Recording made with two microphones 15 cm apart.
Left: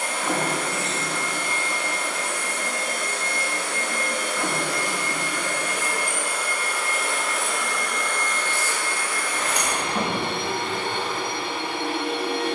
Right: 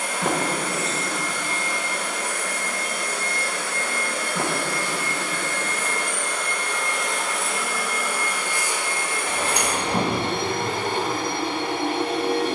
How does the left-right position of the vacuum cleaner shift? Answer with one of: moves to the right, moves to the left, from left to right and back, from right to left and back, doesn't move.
moves to the right.